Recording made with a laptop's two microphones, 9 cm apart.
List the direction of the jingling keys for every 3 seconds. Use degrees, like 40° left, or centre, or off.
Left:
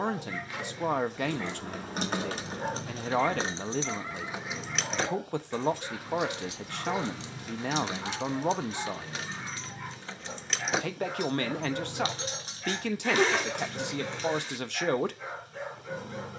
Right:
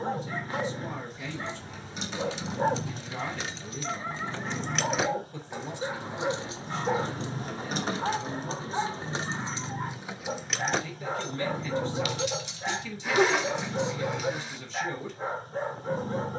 60° left, 10° left, 40° right, 10° right, 50° left, off.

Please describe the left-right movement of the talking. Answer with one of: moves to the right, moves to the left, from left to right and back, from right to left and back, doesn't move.
doesn't move.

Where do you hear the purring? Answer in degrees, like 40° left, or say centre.
40° right.